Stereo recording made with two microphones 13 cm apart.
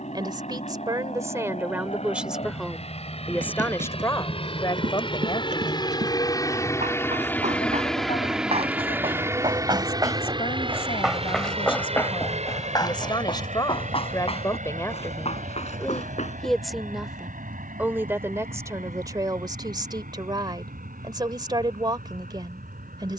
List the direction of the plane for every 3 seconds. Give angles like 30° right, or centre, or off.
60° left, 50° left, 10° left, 30° right, 60° right, 70° right, 70° right, 80° right.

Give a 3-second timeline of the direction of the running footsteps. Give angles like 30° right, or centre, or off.
off, 70° right, 60° right, 20° right, 40° left, 60° left, off, off.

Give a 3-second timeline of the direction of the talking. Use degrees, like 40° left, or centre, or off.
20° right, 30° left, 60° left, 50° left, 30° left, centre, 30° right, 30° right.